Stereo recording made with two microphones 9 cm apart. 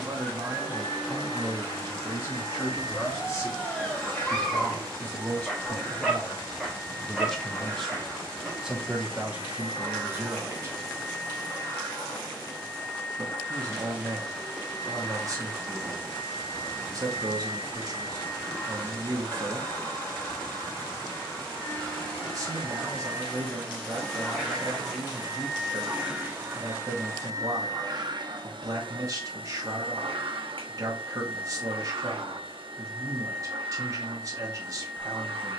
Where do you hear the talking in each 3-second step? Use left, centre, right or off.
centre, left, centre, right, right, right, right, right, right, right, right, right.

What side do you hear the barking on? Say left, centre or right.
centre.